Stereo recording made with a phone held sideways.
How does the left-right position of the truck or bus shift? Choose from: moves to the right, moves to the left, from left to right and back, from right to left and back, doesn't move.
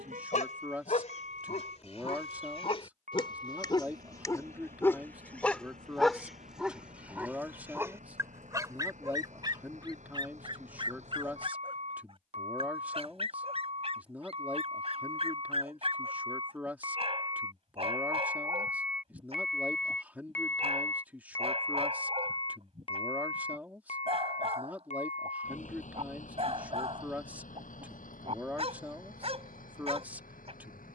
moves to the left.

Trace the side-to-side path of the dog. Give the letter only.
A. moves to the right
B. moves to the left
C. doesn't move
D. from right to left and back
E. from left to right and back
A.